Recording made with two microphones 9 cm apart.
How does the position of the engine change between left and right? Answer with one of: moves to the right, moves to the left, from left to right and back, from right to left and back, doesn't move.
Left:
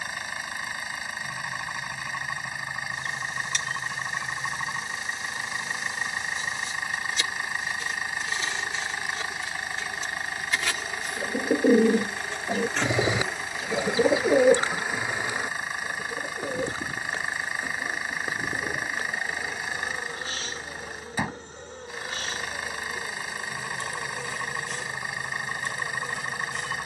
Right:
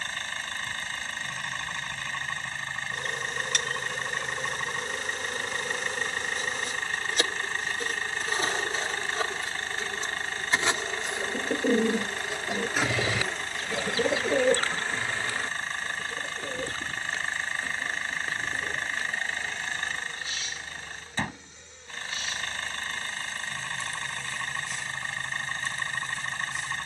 doesn't move.